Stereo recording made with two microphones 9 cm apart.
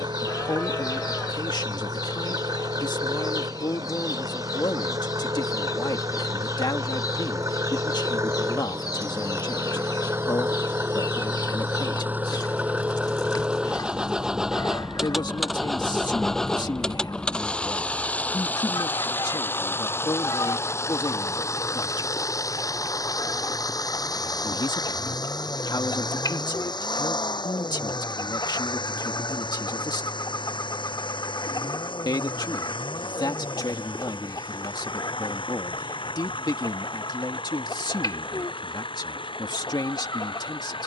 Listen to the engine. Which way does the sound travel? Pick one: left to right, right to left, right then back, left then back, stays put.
right to left.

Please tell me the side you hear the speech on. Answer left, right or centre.
left.